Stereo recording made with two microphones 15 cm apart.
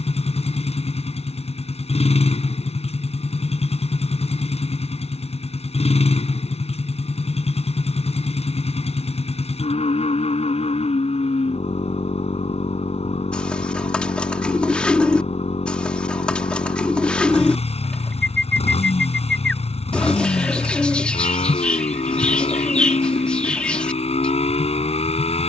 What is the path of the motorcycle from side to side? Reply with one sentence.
In this clip you hear the motorcycle stay in one place.